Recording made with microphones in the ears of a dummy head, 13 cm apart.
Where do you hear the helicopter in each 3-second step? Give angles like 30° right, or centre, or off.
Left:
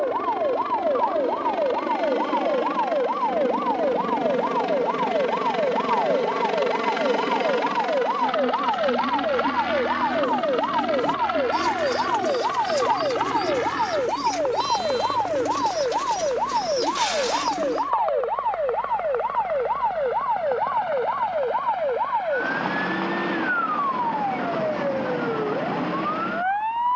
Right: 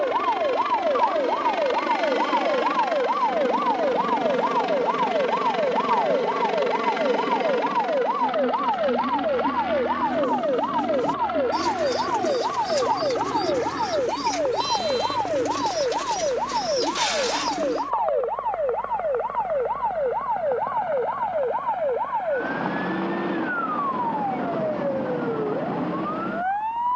50° right, 20° right, 10° left, 40° left, 50° left, 60° left, 70° left, 70° left, 70° left.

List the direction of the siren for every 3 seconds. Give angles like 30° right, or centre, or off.
40° right, 20° right, 10° right, 10° left, 20° left, 30° left, 40° left, 40° left, 50° left.